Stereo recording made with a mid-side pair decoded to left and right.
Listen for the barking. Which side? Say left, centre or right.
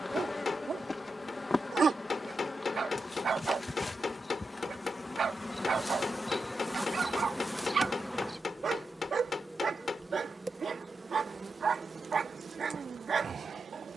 right.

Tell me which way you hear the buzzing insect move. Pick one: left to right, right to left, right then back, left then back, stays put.
left to right.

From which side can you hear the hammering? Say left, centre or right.
left.